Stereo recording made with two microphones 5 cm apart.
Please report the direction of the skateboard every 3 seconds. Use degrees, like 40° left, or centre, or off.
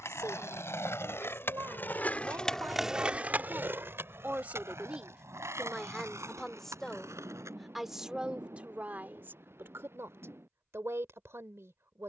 40° left, 60° right, 80° right, off.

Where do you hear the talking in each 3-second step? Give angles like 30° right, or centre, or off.
70° right, 30° right, 10° right, 60° right.